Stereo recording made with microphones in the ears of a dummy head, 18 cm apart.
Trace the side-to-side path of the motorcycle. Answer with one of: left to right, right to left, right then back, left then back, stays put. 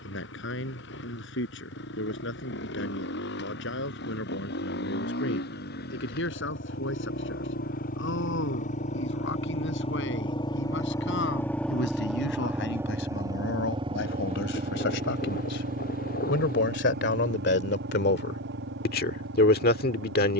left to right.